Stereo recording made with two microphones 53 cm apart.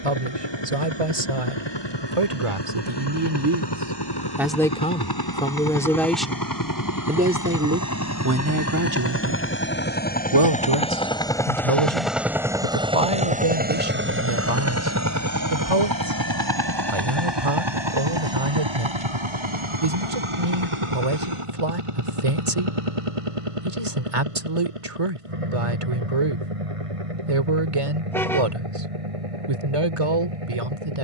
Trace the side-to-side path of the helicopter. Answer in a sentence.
You can hear the helicopter travel towards the right.